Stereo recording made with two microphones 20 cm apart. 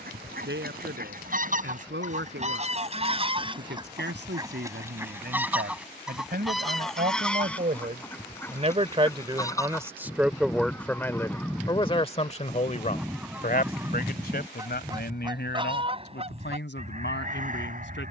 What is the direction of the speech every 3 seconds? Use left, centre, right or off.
right, right, right, centre, left, left.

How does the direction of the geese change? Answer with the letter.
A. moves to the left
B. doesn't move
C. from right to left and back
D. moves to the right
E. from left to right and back
C.